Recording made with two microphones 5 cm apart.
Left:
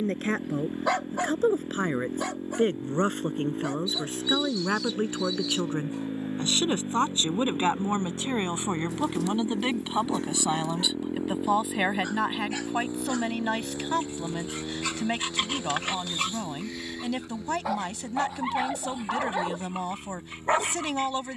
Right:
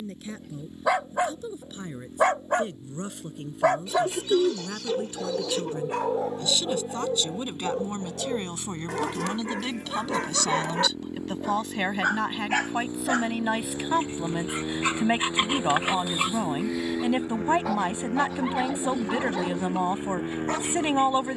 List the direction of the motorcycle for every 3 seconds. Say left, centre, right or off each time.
left, left, left, left, centre, right, right.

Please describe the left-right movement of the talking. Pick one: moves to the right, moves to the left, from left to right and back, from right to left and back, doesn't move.
moves to the right.